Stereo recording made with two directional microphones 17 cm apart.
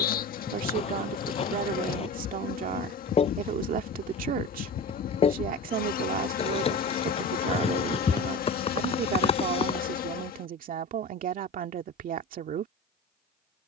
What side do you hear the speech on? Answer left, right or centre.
right.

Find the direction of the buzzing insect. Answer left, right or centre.
left.